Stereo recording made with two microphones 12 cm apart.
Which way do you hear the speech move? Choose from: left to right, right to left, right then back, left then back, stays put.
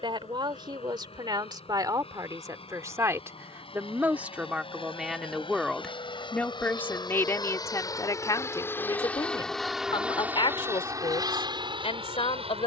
right to left.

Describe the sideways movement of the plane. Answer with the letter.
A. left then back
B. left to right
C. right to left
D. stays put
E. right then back
B.